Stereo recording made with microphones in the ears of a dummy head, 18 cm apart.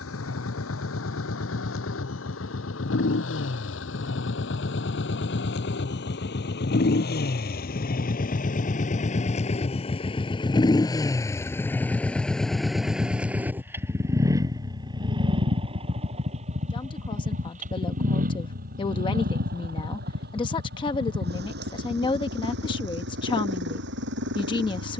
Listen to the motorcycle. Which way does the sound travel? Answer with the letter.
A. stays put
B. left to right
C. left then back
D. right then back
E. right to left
B.